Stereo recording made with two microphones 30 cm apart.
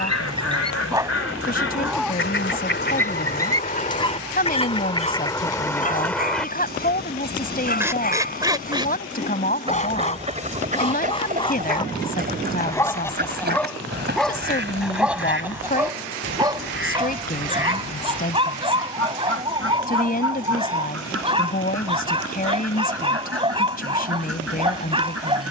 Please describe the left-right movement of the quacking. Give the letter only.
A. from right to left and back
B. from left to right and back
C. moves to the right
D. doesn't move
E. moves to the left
C.